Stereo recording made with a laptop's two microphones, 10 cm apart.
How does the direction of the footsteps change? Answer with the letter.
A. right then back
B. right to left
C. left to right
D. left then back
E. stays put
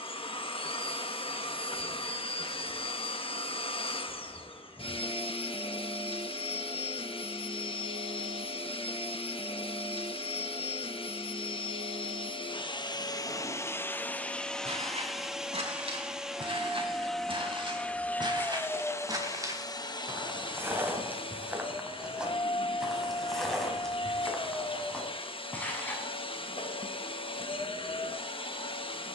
B.